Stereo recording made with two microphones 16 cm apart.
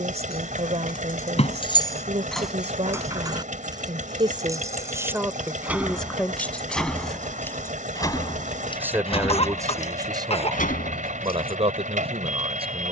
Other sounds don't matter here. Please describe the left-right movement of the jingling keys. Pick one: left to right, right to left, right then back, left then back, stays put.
right then back.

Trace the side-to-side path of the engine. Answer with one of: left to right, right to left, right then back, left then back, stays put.
stays put.